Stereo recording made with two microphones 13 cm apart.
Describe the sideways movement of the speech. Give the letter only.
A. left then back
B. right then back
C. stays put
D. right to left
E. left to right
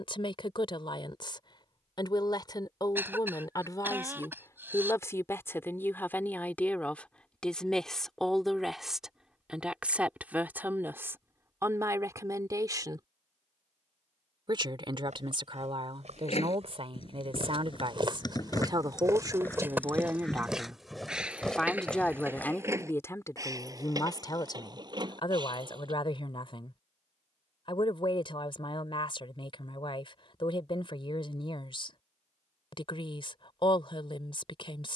B.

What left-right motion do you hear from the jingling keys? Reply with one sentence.
In this clip you hear the jingling keys move to the right.